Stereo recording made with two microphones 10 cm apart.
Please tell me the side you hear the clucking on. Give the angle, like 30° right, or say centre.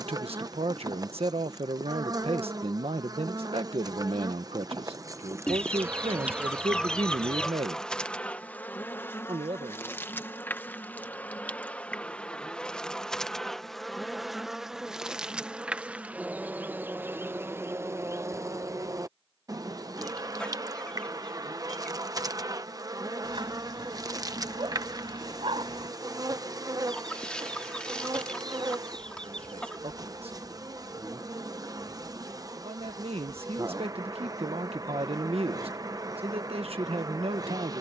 10° left.